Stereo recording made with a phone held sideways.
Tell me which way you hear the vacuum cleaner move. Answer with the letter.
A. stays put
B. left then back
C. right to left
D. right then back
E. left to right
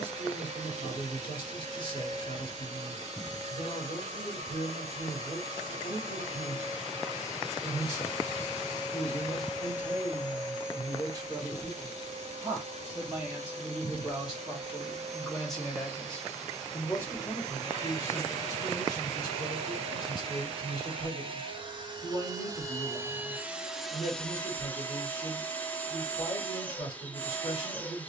C.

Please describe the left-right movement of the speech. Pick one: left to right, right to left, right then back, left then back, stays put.
right then back.